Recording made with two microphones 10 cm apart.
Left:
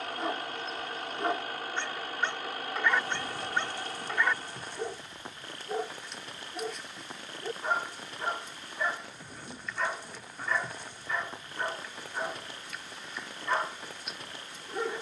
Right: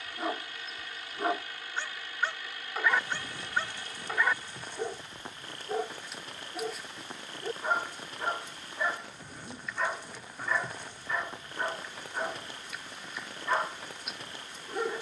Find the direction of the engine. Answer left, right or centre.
left.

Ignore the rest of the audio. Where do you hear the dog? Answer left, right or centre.
centre.